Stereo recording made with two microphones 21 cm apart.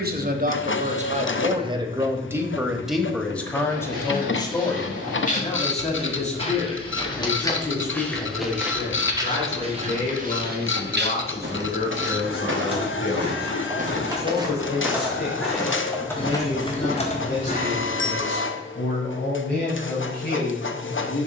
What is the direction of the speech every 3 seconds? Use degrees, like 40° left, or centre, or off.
30° right, 20° left, 40° left, 50° left, 50° left, 50° left, 60° left.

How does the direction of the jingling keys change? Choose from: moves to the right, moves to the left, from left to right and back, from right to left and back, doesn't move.
moves to the left.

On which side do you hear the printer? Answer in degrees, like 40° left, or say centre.
70° left.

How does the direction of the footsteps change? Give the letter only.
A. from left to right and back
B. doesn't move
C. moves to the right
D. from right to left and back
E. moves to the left
A.